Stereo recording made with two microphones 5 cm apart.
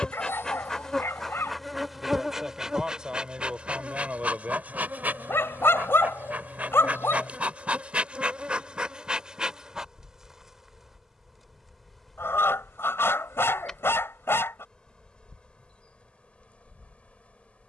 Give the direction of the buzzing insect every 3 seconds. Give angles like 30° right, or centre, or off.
centre, 30° right, 30° right, 10° right, 10° left, 30° left.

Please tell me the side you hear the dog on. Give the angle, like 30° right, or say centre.
60° left.